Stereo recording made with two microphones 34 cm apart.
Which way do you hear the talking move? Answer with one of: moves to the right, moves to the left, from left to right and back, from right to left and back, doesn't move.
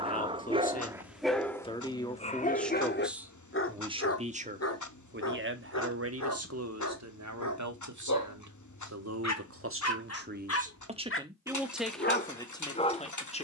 from left to right and back.